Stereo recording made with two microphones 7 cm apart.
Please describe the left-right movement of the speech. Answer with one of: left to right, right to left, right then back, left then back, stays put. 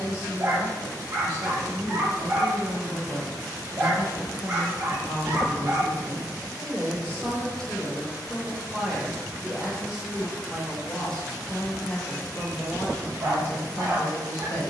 right then back.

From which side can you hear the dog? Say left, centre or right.
right.